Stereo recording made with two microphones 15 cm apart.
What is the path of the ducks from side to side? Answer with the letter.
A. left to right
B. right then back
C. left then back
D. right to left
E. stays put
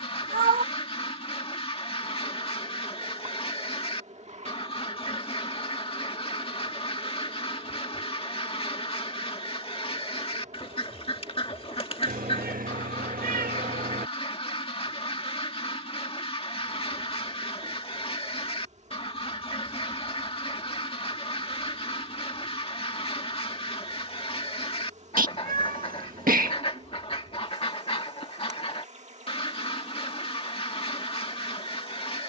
E.